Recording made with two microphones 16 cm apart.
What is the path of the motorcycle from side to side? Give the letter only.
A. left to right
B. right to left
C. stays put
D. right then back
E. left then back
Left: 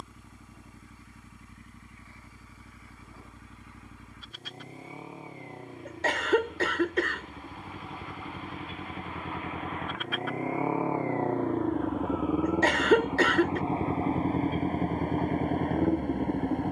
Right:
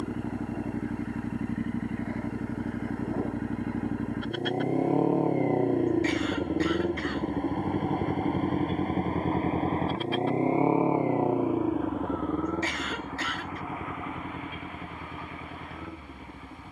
B.